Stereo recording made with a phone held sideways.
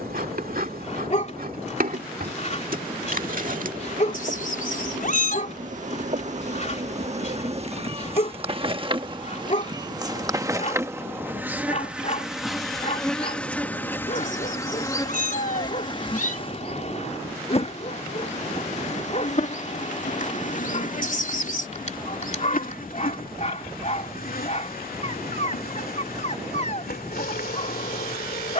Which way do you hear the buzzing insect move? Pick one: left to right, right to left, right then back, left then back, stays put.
right to left.